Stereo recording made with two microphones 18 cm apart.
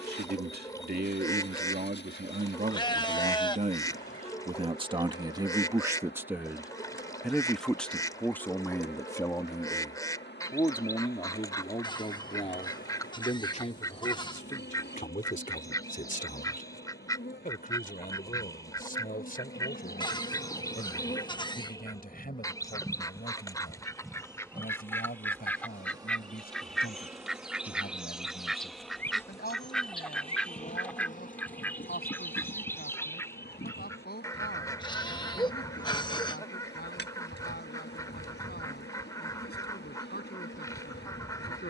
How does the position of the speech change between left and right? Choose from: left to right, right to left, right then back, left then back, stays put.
right to left.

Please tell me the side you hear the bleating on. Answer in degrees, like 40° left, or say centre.
30° left.